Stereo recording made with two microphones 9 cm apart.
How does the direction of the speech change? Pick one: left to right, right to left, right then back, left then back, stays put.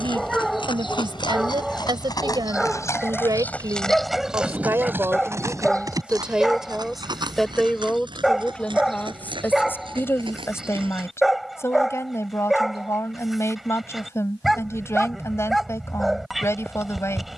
right to left.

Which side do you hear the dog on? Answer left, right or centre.
centre.